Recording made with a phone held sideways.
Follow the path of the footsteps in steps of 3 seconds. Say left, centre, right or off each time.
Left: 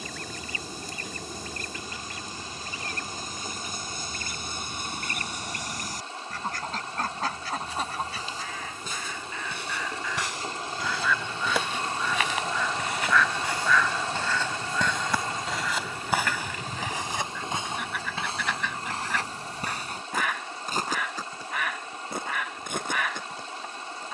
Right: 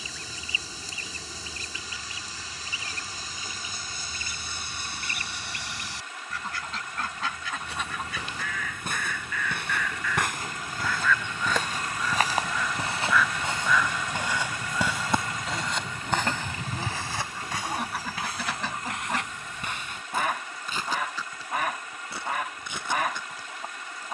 off, off, right, right, right, centre, left, left.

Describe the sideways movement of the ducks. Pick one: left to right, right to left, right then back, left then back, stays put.
left to right.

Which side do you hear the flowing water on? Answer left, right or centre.
left.